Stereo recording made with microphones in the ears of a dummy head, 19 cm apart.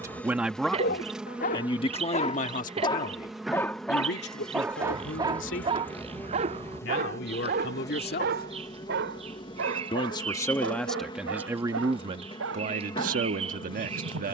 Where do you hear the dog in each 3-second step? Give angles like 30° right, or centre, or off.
40° left, 10° right, 40° right, 60° right, 70° right.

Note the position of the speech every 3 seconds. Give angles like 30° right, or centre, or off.
20° left, 50° left, 50° left, centre, 40° right.